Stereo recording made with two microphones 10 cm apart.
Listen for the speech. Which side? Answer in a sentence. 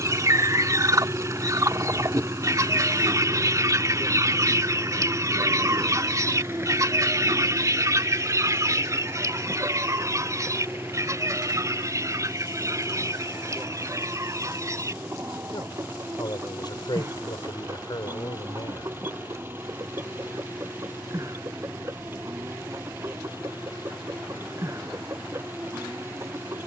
In this clip you hear the speech on the left.